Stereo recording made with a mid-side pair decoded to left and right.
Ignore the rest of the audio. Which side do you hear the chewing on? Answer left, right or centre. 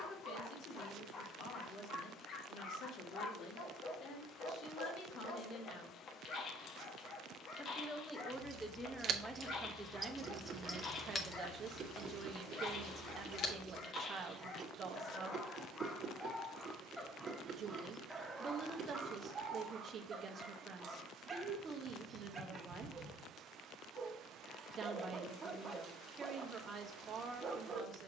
right.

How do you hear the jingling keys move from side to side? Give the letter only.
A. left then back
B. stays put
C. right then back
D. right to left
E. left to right
D.